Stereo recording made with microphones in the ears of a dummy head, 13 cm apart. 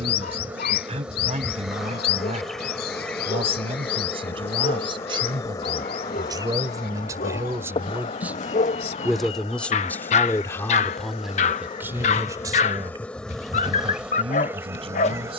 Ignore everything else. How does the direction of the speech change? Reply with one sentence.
You can hear the speech go left and come back.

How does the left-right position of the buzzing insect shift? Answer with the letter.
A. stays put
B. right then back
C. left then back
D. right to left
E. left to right
C.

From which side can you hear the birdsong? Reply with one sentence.
You can hear the birdsong on the left.